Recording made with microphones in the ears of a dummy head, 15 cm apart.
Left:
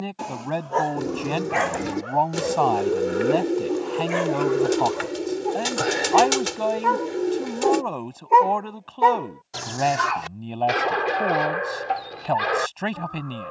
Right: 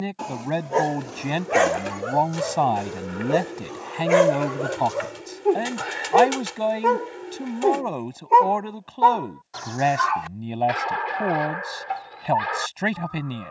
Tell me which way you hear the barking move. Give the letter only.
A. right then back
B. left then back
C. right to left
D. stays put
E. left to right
A.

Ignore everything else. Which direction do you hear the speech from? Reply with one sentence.
You can hear the speech in the centre.